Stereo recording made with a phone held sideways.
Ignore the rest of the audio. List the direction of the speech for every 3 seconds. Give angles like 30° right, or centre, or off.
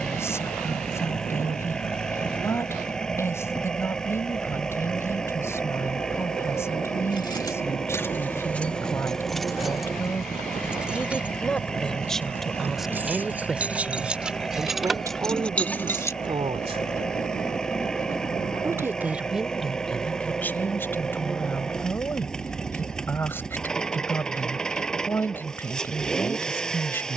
20° left, 20° left, 20° left, 10° left, 10° right, 30° right, centre, 10° left, 10° left.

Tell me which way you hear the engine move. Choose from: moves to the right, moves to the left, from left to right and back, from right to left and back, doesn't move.
doesn't move.